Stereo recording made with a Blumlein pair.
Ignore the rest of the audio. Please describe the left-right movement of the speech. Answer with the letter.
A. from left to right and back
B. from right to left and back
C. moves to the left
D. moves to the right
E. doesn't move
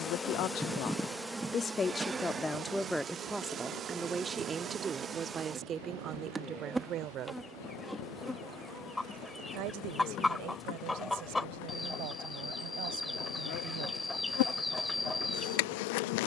D.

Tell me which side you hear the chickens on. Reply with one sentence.
In this clip you hear the chickens in the centre.